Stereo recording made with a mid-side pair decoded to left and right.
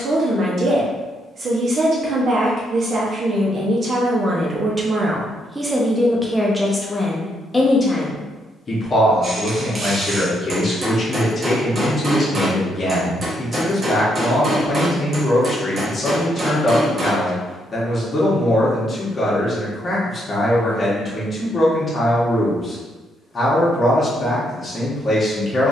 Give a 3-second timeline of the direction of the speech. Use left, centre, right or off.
right, right, centre, left, left, left, left, left, left.